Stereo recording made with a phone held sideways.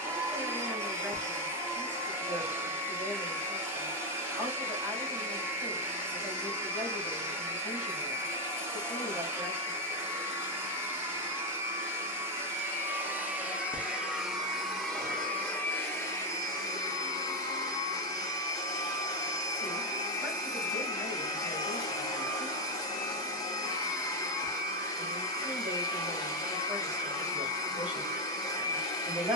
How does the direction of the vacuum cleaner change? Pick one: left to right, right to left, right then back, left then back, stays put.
right to left.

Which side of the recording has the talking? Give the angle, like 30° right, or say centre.
10° right.